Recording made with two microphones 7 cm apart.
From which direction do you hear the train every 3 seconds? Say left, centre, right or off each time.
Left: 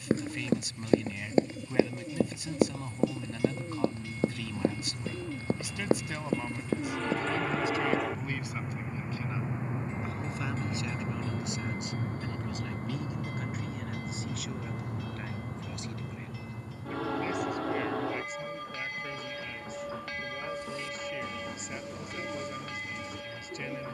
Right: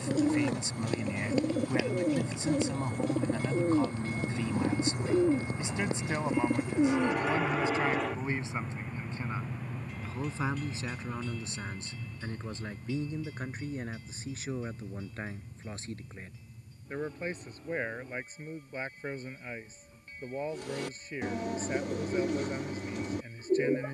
right, right, centre, left, left, left, left, left.